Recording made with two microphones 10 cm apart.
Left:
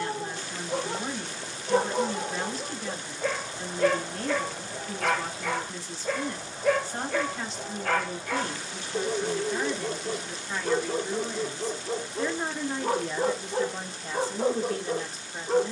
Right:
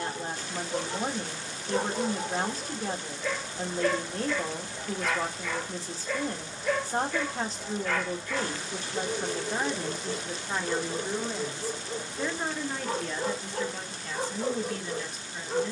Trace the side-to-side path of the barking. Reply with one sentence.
In this clip you hear the barking stay in one place.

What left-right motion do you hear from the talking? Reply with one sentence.
You can hear the talking go from the right side to the left.